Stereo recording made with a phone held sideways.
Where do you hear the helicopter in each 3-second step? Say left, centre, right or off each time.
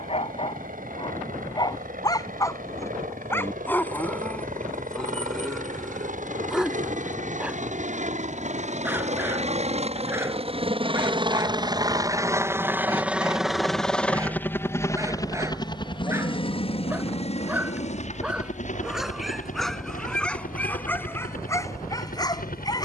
right, right, right, right, centre, left, left, left.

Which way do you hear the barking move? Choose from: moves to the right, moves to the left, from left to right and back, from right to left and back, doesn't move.
from left to right and back.